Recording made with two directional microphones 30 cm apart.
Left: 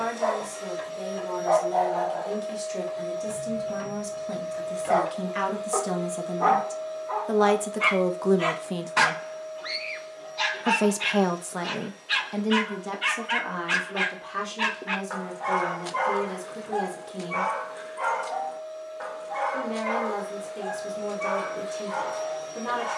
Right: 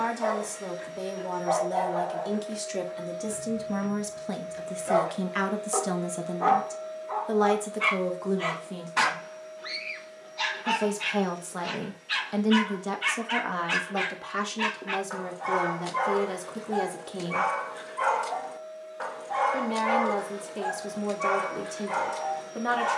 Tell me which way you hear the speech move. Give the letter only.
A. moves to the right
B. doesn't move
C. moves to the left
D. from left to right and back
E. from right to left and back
E.